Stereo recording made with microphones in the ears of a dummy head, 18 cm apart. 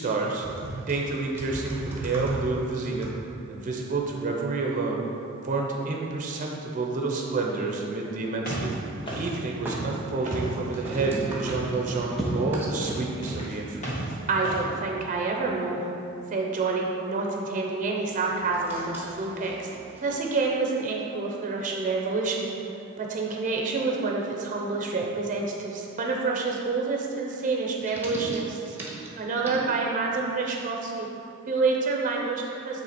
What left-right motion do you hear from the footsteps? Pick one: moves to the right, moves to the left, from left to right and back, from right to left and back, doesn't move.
from left to right and back.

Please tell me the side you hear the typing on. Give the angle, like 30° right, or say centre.
10° right.